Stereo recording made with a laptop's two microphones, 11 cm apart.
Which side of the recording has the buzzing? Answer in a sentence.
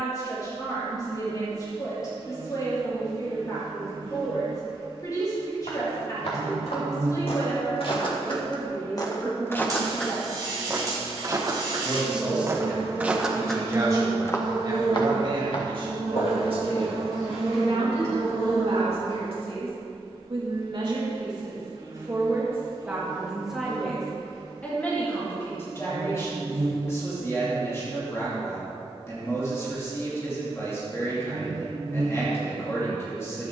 In this clip you hear the buzzing on the right.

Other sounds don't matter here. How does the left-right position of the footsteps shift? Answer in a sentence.
You can hear the footsteps move from left to right and back again.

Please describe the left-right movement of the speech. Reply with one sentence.
In this clip you hear the speech move from left to right and back again.